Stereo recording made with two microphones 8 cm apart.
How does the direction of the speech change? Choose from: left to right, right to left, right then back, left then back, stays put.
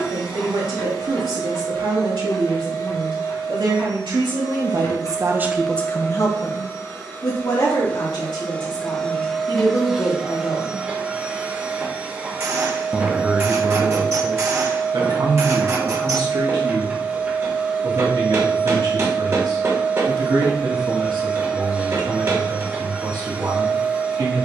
left then back.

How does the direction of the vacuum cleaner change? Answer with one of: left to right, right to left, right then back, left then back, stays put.
left to right.